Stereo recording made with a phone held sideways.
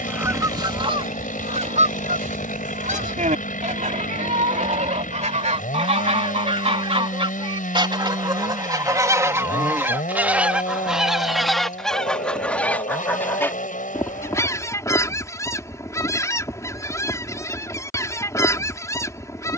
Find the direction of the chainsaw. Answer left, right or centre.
left.